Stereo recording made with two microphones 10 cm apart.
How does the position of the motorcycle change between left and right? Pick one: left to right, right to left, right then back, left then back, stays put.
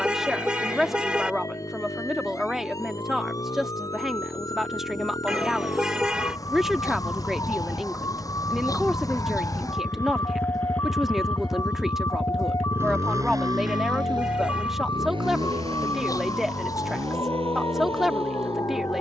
left to right.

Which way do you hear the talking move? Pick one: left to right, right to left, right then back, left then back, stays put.
stays put.